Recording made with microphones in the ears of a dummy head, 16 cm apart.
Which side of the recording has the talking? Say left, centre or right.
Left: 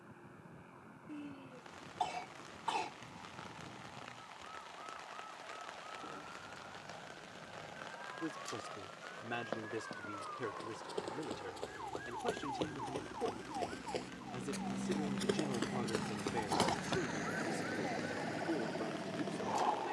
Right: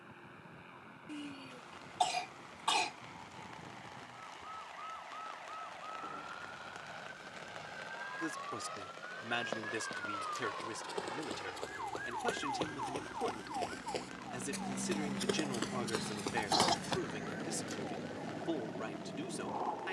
right.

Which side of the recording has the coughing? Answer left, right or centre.
right.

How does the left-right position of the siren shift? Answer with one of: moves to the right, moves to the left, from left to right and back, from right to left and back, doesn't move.
moves to the left.